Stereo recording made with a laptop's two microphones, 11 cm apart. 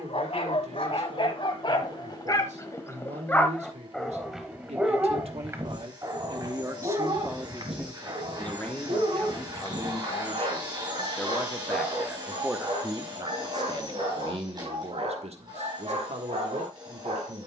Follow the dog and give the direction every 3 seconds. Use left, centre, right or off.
left, centre, right, right, right, right.